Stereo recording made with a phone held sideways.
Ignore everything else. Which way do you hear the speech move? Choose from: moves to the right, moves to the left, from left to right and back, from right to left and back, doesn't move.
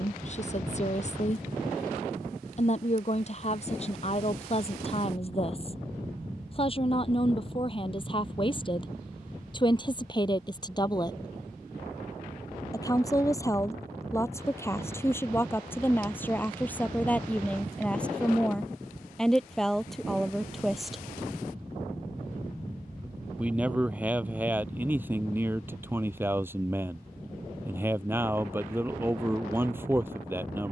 moves to the right.